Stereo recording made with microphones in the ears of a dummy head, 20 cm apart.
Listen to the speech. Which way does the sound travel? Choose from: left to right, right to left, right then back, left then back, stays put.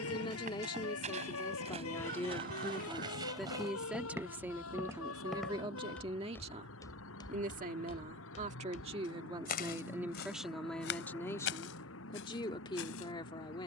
right then back.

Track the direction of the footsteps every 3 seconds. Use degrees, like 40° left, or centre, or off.
30° right, 10° right, 20° left, 50° left, 60° left.